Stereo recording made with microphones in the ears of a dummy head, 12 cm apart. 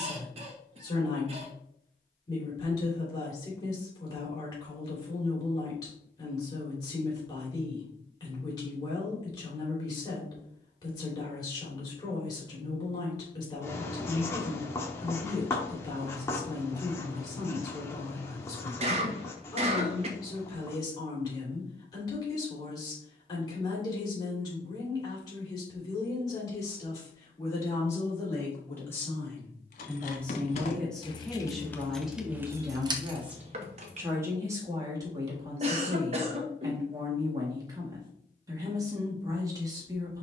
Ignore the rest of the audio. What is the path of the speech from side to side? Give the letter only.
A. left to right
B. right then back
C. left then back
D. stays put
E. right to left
A.